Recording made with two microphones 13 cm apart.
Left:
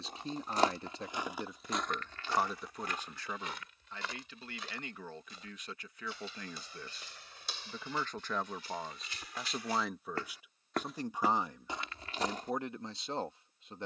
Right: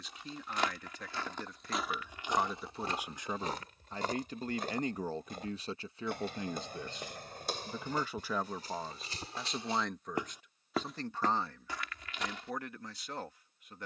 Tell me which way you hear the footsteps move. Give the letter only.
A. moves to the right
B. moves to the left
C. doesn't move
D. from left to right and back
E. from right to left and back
D.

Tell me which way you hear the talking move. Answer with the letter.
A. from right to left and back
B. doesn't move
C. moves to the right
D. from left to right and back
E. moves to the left
D.